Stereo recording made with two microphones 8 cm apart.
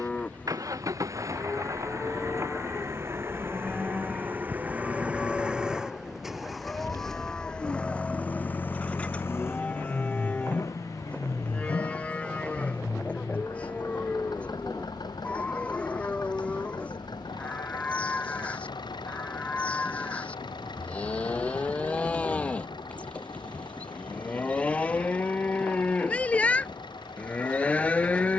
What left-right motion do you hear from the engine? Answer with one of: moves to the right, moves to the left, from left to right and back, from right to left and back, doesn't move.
moves to the left.